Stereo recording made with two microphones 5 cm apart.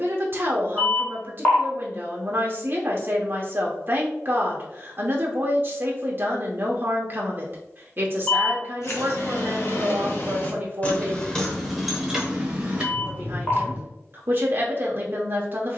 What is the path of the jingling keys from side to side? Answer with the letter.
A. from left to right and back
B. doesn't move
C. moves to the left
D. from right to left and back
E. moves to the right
E.